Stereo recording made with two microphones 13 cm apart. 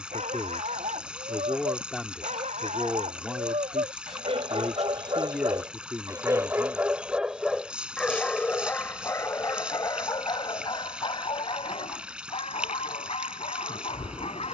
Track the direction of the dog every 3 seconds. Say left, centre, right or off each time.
right, right, centre, left, left.